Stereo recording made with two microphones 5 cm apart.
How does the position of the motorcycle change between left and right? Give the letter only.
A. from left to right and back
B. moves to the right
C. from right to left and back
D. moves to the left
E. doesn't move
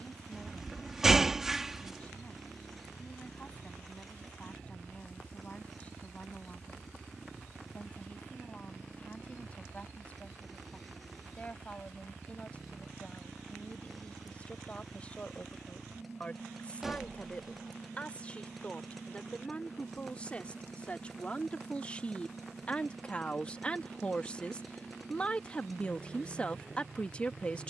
E.